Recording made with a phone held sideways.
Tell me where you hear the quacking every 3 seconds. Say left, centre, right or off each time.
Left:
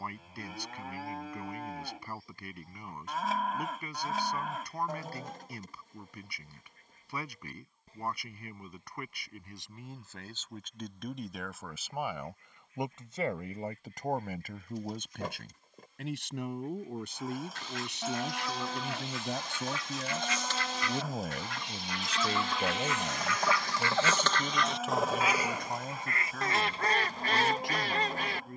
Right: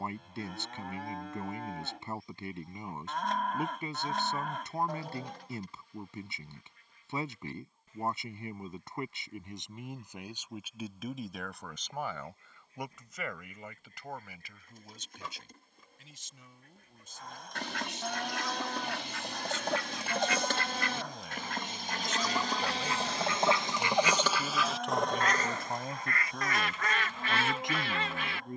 left, left, left, centre, right, right, right, right, centre, left.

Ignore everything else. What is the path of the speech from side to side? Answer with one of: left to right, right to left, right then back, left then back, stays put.
left then back.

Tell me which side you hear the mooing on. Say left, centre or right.
centre.